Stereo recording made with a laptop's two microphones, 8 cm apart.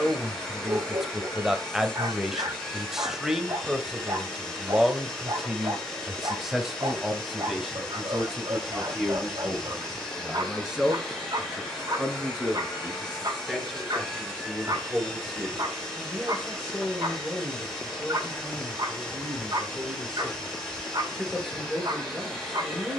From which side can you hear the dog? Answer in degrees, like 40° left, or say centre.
60° right.